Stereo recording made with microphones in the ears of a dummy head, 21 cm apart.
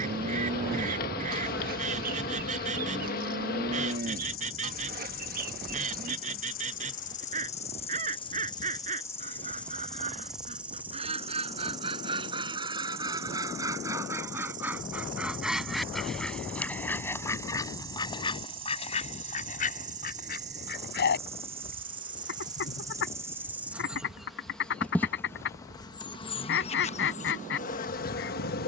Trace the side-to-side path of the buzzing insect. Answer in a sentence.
You can hear the buzzing insect move from left to right and back again.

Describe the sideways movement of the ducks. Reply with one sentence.
In this clip you hear the ducks go from the right side to the left.